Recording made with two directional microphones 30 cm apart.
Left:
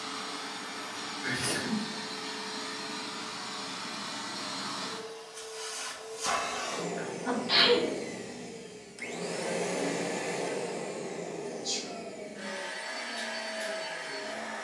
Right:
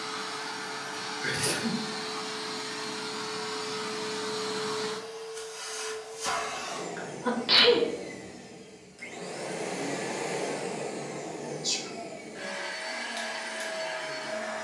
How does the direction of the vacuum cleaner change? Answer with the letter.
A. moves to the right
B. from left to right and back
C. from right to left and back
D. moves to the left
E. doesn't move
C.